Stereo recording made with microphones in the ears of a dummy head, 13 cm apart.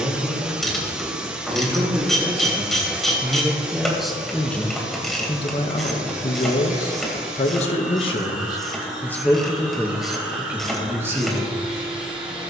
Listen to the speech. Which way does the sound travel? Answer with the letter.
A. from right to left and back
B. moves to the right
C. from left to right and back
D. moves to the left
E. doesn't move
A.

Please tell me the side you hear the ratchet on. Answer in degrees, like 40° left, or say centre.
centre.